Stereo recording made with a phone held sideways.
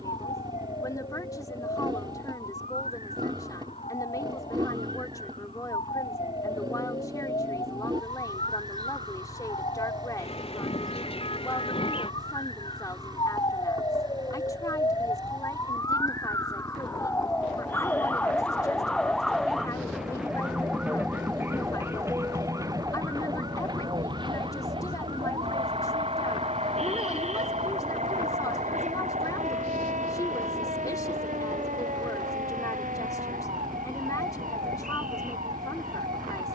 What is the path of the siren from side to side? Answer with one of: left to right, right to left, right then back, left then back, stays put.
left to right.